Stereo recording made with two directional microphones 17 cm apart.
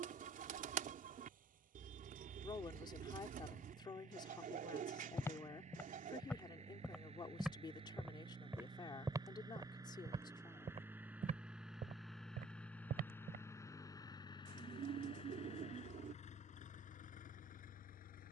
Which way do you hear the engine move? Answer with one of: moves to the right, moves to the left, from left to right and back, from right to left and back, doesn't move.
moves to the left.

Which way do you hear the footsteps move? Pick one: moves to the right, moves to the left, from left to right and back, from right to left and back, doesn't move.
moves to the right.